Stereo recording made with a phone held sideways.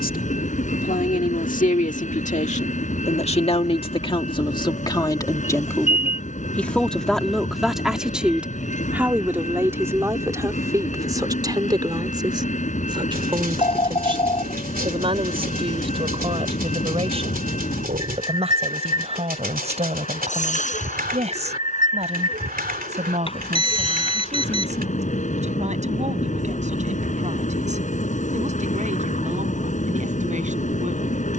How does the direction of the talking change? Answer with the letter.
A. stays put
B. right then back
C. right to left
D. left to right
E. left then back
D.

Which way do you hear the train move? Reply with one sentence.
You can hear the train stay put.